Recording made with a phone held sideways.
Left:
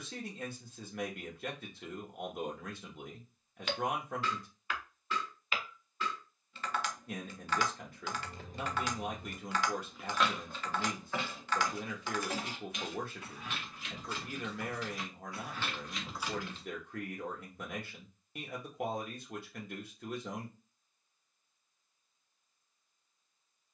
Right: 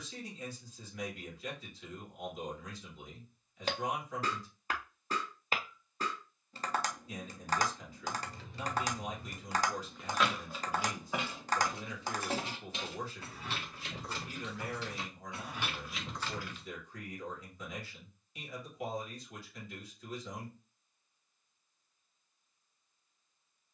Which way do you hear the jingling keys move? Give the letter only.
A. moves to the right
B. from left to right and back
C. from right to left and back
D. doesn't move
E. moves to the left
B.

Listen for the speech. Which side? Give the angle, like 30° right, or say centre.
60° left.